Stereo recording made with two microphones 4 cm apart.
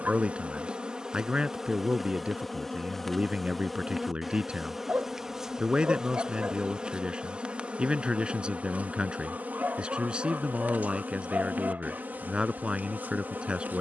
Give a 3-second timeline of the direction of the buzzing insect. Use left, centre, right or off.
centre, centre, right, right, right.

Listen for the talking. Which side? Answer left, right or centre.
right.